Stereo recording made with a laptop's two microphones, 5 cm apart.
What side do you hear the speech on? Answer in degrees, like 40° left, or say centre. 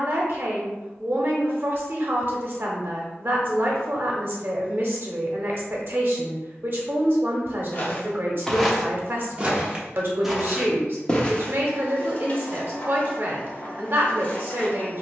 50° right.